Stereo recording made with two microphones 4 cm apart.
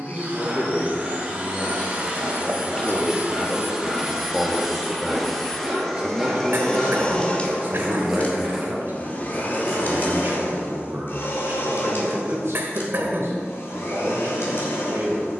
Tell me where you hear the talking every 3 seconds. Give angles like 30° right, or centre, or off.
30° left, centre, 40° right, 60° right, 70° right.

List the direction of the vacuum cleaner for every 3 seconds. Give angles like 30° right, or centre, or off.
30° right, 10° right, 20° left, 50° left, 70° left.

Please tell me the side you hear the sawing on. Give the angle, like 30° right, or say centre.
10° right.